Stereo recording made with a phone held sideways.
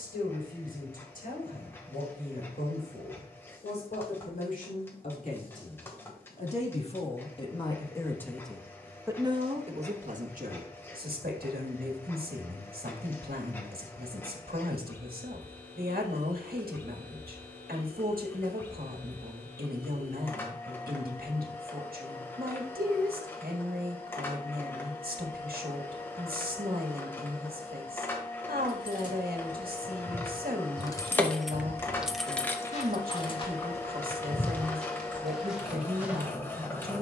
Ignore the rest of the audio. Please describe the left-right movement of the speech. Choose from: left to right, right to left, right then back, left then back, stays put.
left to right.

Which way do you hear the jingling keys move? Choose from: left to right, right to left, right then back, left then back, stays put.
right then back.